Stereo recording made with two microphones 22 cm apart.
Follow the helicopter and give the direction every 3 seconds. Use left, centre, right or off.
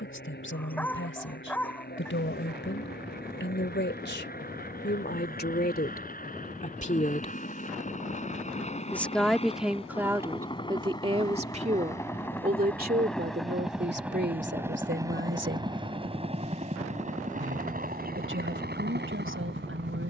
left, left, left, left, centre, right, right.